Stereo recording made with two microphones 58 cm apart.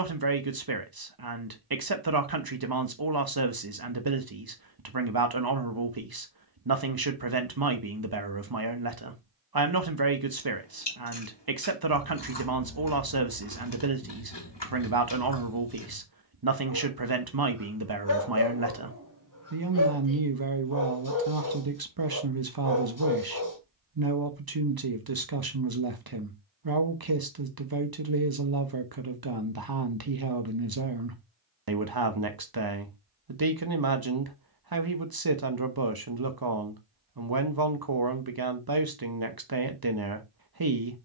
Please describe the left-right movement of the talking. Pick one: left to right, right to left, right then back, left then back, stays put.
stays put.